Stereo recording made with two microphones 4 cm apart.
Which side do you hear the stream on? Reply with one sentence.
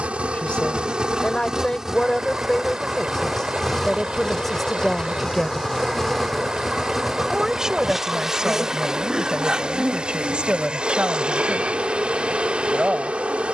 You can hear the stream on the right.